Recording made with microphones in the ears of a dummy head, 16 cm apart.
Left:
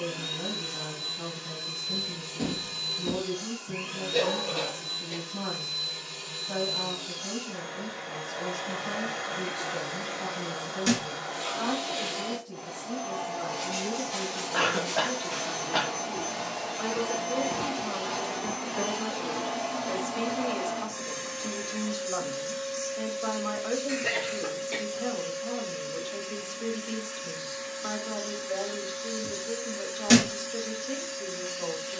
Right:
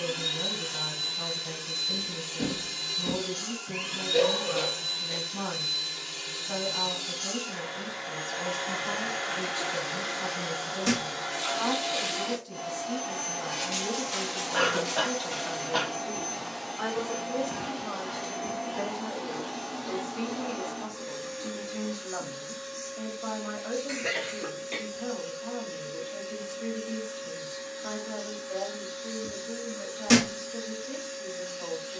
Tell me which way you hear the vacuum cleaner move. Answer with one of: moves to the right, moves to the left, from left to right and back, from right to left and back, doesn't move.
moves to the left.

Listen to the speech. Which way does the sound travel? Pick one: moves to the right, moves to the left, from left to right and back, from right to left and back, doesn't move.
moves to the left.